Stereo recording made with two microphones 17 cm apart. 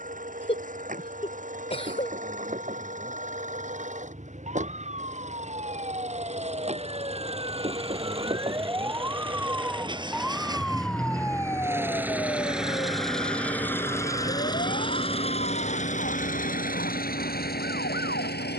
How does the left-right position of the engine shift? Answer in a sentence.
You can hear the engine go from the right side to the left.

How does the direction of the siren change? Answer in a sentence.
In this clip you hear the siren move to the left.